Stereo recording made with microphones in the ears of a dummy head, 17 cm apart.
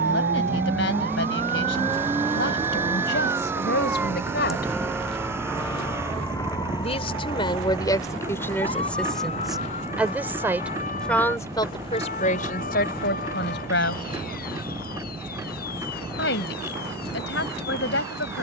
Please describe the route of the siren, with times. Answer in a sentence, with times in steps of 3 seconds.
In this clip you hear the siren on the right from 0 s, in the centre from 3 s and on the left from 6 s.